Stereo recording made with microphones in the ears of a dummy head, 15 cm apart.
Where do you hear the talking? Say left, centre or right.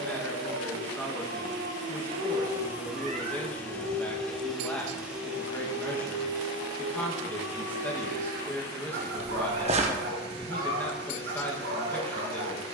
centre.